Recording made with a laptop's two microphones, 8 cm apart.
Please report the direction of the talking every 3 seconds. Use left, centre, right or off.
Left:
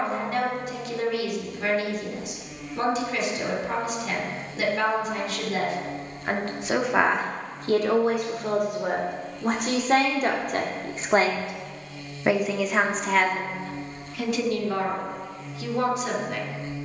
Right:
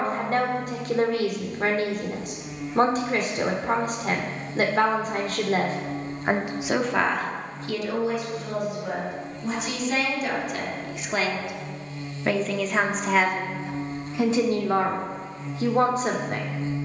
right, right, left, left, centre, right.